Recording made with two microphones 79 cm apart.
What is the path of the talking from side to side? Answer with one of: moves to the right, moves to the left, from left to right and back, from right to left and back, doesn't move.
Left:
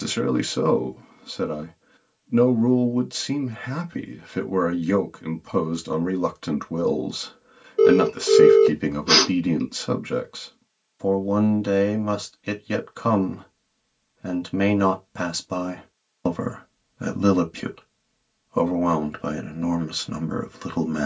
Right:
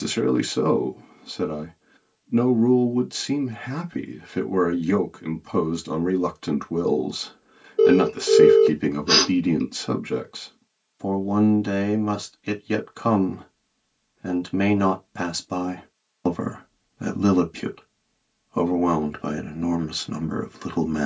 doesn't move.